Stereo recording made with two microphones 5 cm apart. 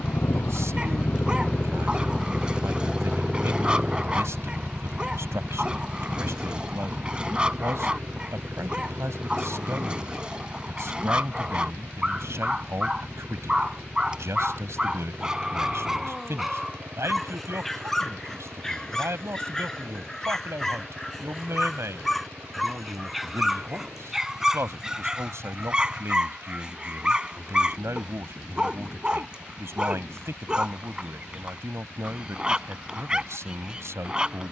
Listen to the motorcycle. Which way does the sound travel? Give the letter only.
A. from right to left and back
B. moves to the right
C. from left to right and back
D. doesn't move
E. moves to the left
B.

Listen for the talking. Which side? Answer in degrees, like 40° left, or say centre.
70° right.